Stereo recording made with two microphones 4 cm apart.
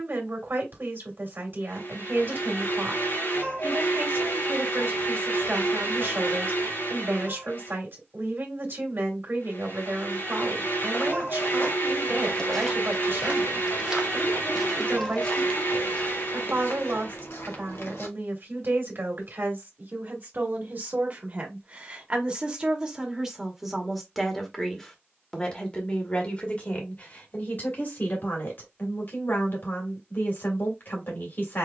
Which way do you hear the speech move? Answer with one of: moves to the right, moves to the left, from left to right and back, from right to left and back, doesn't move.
moves to the left.